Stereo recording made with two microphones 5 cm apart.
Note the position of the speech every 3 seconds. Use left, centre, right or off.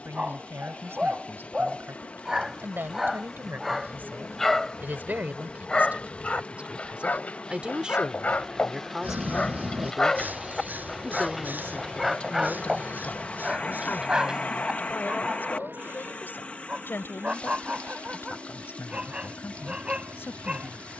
right, right, right, centre, left, left, left.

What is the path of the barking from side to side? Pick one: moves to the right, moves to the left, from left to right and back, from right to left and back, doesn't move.
from right to left and back.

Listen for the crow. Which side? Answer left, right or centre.
right.